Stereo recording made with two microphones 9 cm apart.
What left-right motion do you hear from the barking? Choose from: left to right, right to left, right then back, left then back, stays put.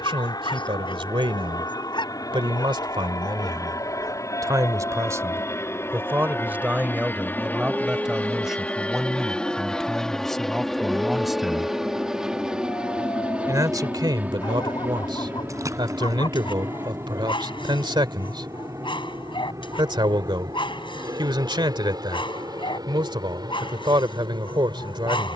right then back.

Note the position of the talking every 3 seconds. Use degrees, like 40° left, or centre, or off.
70° right, 40° right, 10° right, centre, 50° right, 60° right, 60° right, 60° right, 60° right.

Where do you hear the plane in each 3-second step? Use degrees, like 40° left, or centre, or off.
50° left, 30° left, 20° left, centre, 10° right, 30° right, 40° right, 40° right, 50° right.